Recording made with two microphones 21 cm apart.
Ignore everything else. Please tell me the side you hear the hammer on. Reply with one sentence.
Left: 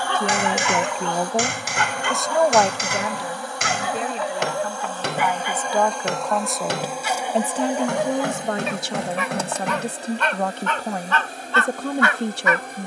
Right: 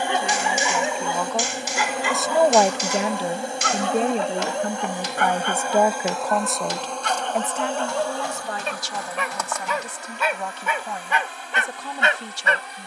In this clip you hear the hammer on the left.